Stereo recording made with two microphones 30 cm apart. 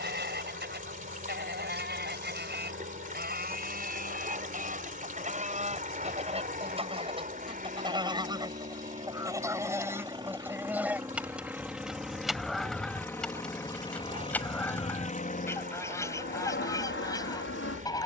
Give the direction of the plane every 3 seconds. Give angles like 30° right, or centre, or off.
50° right, 40° right, 30° right, 10° right, 10° left, 30° left.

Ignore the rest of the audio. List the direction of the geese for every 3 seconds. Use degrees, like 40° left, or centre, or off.
30° right, 30° right, 20° right, 10° right, centre, 10° left.